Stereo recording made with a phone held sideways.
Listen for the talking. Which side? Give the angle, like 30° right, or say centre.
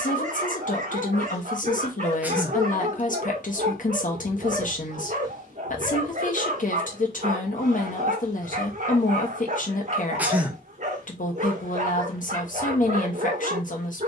60° left.